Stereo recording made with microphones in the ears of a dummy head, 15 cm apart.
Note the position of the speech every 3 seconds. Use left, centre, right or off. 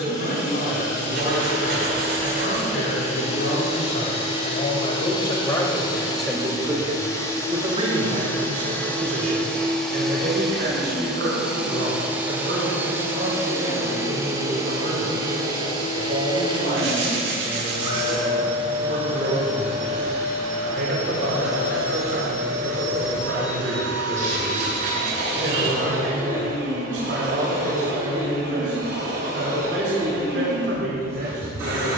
left, left, right, right, right, right, right, right, right, right, right.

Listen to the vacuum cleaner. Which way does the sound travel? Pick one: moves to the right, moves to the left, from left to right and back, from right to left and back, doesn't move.
moves to the right.